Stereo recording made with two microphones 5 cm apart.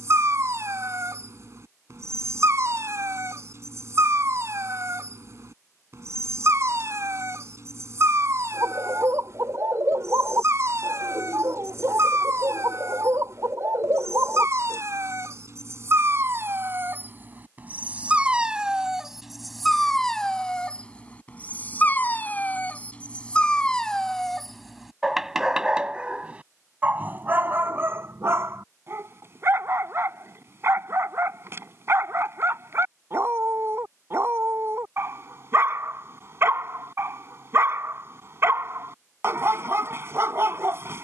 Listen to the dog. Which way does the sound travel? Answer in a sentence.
In this clip you hear the dog go left and come back.